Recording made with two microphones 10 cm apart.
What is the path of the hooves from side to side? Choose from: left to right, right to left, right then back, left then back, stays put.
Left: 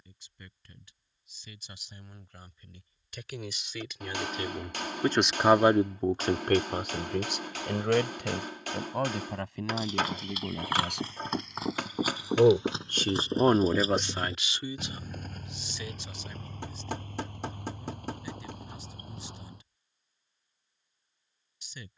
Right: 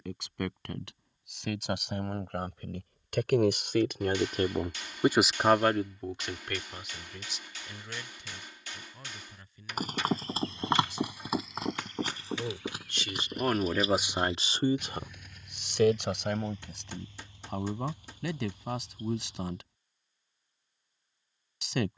right to left.